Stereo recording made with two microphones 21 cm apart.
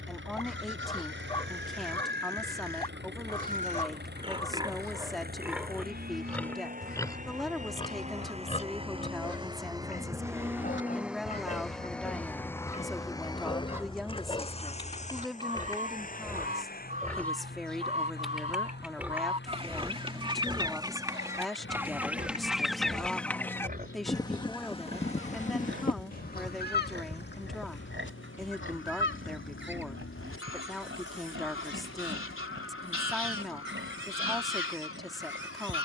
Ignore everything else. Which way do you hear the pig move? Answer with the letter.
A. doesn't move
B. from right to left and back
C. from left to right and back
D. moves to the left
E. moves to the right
B.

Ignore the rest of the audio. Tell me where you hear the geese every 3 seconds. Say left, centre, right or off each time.
left, left, left, left, centre, right, right, centre, left, left, left, left.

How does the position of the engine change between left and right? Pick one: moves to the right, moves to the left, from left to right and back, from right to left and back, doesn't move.
moves to the left.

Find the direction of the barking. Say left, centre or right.
left.